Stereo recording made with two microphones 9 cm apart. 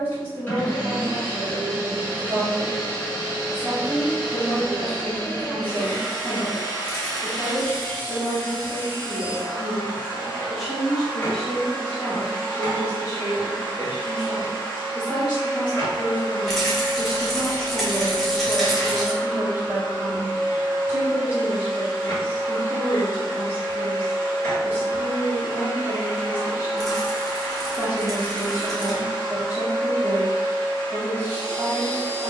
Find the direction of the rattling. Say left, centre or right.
centre.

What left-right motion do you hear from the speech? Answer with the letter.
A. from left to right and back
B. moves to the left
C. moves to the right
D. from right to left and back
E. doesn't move
D.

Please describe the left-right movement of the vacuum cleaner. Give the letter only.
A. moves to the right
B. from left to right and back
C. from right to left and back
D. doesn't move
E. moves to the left
D.